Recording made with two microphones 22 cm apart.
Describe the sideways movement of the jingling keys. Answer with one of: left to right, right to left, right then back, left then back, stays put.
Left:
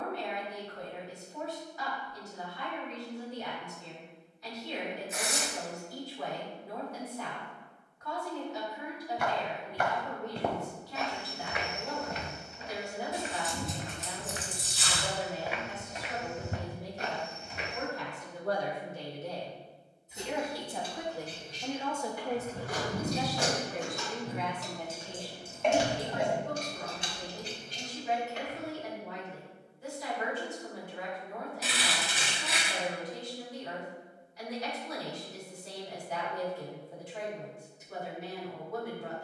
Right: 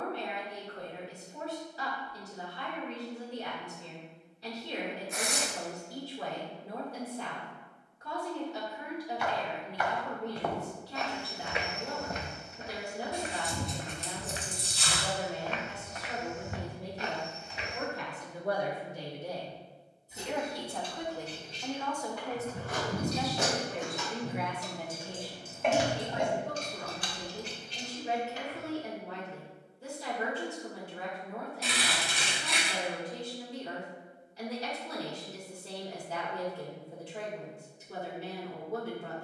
right to left.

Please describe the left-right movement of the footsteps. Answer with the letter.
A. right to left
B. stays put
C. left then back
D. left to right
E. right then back
E.